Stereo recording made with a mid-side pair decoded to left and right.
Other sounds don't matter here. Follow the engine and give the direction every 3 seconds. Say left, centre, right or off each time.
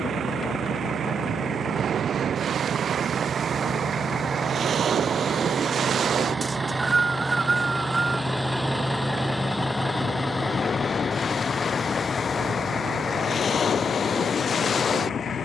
right, right, centre, left, left.